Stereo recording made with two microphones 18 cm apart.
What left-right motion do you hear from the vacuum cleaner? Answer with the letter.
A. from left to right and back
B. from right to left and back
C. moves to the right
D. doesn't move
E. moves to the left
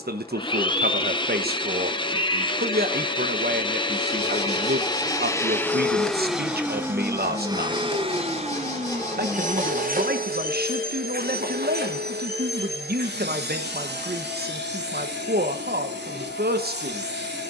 C.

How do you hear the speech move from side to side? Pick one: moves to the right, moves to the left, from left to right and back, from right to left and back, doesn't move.
doesn't move.